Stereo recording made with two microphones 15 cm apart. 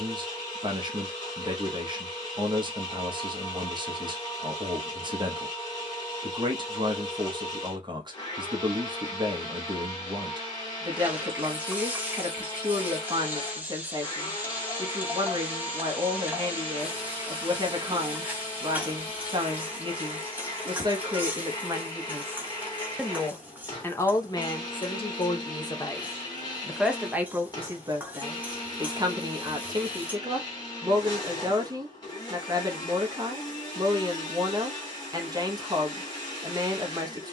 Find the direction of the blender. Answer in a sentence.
You can hear the blender on the left.